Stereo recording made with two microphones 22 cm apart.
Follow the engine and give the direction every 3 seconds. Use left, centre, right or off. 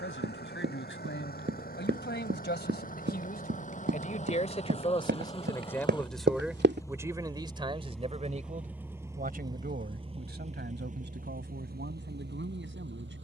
left, left, centre, right, right.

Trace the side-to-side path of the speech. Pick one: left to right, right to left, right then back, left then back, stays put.
left to right.